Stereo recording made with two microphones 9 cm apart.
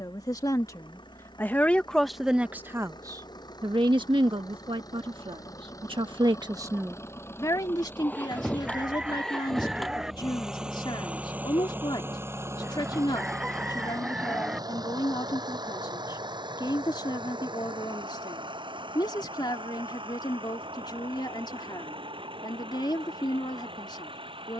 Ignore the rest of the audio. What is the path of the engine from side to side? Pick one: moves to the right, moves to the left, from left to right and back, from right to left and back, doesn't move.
moves to the right.